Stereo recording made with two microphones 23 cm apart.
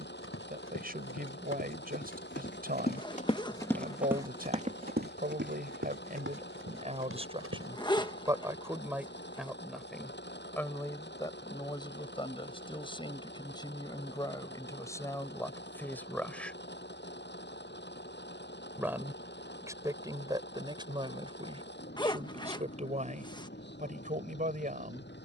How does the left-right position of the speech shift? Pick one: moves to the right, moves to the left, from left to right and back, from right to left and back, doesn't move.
from right to left and back.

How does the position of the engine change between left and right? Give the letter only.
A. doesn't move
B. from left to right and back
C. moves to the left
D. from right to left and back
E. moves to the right
A.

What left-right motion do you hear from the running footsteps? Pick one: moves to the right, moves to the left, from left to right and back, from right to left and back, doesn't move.
moves to the right.